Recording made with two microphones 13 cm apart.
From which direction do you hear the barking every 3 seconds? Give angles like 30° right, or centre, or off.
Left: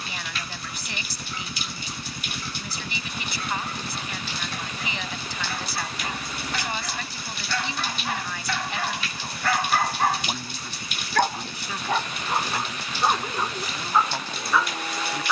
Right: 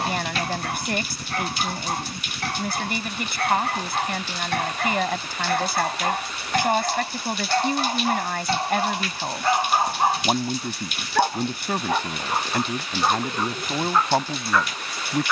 80° right, 70° right, 40° right, 20° right, centre.